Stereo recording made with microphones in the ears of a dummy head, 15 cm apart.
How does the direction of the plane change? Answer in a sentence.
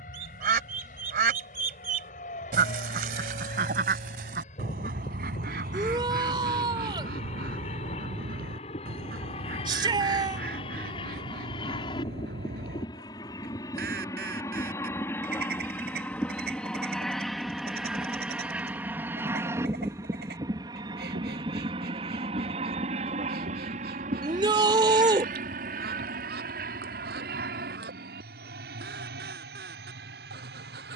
You can hear the plane move to the right.